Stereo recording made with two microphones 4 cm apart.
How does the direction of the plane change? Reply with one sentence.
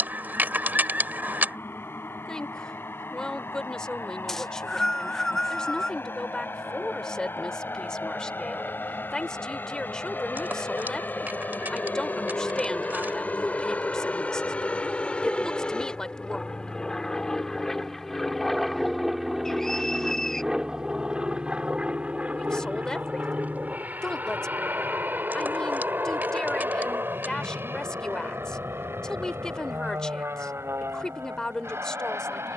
In this clip you hear the plane go from the left side to the right.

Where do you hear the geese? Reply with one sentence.
You can hear the geese on the right.